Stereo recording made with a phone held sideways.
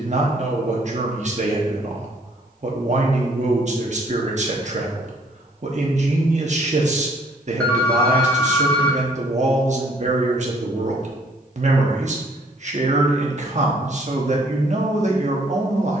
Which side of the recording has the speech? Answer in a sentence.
You can hear the speech on the right.